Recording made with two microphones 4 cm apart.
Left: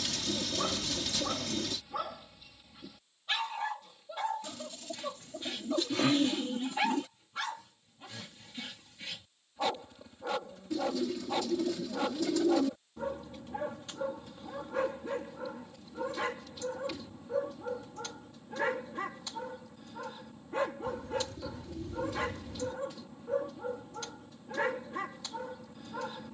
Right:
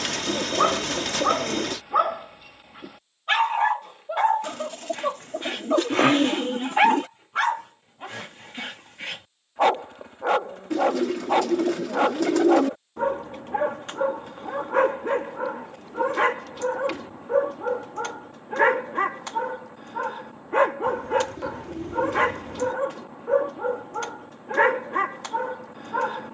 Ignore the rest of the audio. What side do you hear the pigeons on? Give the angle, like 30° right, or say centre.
70° right.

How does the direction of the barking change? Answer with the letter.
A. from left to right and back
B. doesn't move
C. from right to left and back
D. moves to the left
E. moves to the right
B.